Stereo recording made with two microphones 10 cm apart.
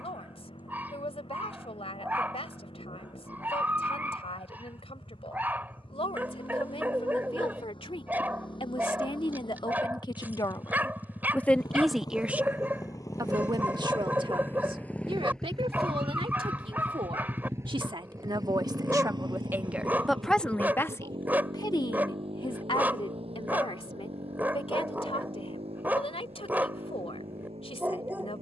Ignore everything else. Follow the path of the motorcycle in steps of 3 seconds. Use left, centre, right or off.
left, left, left, left, left, centre, right, right, right, right.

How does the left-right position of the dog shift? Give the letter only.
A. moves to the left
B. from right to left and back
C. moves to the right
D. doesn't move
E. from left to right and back
D.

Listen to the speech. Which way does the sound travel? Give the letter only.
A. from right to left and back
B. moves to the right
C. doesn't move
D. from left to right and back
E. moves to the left
D.